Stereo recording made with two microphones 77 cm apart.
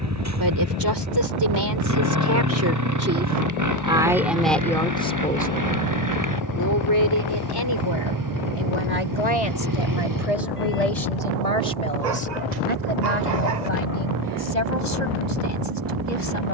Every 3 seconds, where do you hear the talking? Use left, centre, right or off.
right, centre, left, left, left, left.